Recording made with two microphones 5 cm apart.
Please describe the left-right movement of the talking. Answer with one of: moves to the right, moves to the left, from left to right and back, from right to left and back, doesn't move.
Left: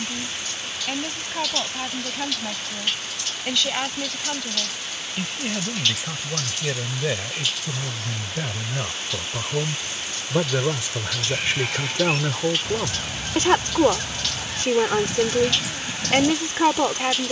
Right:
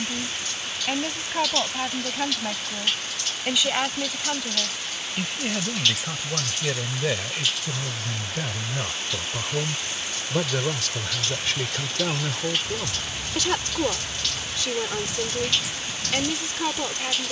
moves to the left.